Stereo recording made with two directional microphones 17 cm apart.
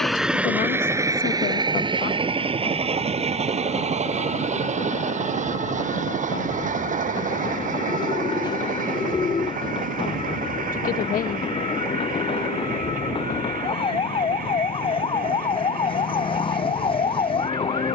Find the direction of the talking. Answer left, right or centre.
left.